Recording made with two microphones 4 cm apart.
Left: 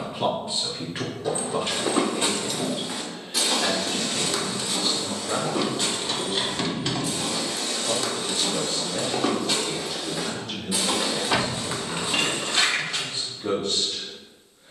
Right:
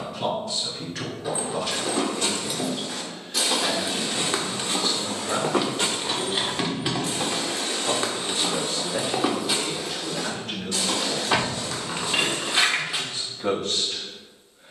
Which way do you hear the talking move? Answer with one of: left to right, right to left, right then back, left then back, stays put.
left to right.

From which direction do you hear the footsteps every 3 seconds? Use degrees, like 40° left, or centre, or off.
20° left, 40° right, 40° right, 10° left, 30° left.